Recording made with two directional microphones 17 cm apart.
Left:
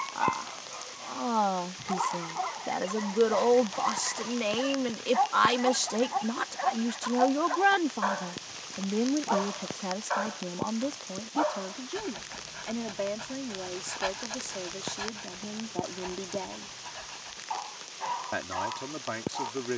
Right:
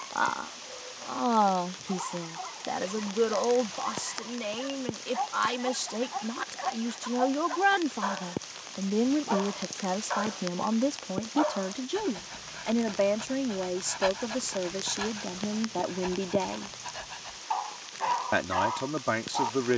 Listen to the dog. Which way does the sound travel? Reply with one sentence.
You can hear the dog go from the left side to the right.